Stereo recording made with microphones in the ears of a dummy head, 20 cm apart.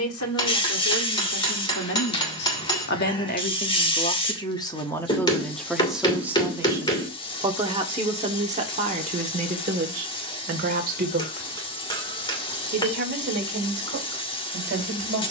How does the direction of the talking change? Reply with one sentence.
In this clip you hear the talking move to the right.